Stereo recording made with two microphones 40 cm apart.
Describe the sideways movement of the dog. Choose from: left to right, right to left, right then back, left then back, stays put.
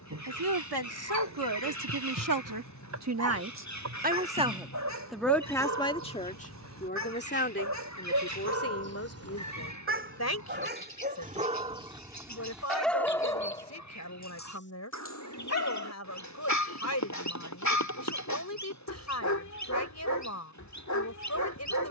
right to left.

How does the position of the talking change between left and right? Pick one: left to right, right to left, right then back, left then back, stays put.
right to left.